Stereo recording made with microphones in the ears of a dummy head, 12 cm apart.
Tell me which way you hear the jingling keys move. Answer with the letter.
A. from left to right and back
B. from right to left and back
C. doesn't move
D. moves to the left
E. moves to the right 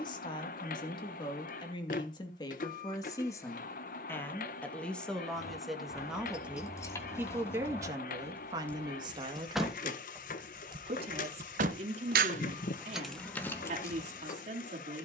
A.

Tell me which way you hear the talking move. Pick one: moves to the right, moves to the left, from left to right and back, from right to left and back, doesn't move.
moves to the right.